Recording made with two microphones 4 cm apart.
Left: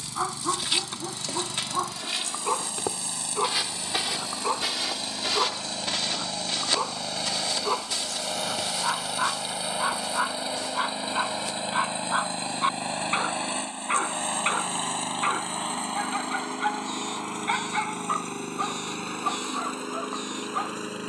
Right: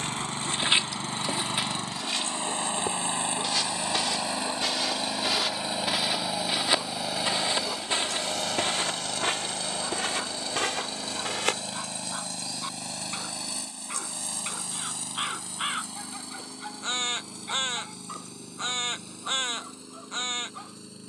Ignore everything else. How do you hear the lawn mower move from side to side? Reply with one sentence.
In this clip you hear the lawn mower go from the right side to the left.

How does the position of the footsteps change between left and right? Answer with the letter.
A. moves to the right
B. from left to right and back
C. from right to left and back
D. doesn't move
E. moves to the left
C.